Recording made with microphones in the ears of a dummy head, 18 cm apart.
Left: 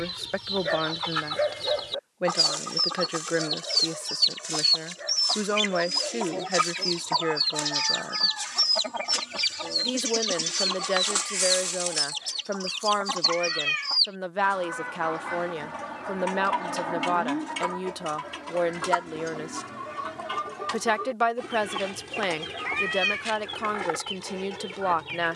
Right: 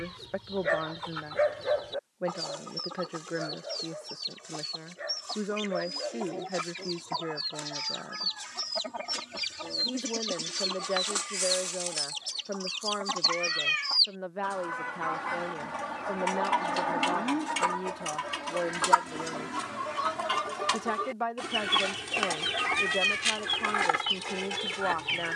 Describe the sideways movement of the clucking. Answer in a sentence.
You can hear the clucking move to the right.